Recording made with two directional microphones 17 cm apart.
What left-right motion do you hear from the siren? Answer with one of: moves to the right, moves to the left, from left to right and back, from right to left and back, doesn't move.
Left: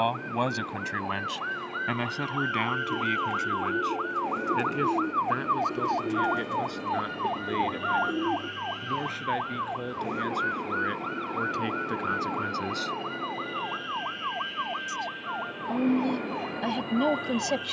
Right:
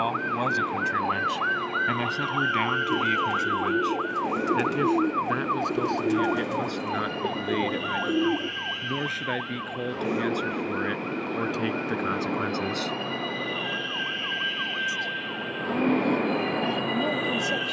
moves to the left.